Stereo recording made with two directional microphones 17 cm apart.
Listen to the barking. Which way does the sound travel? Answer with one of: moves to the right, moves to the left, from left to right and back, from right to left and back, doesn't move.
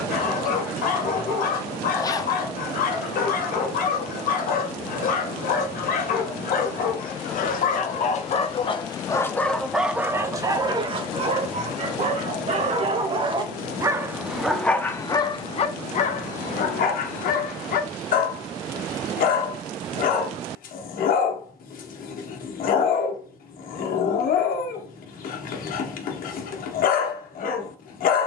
from left to right and back.